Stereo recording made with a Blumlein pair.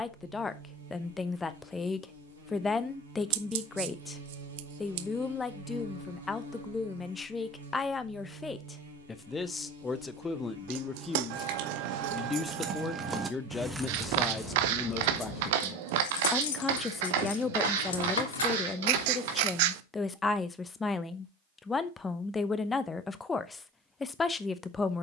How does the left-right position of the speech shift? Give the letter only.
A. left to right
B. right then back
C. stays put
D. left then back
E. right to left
C.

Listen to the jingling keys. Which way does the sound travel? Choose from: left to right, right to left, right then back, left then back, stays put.
right to left.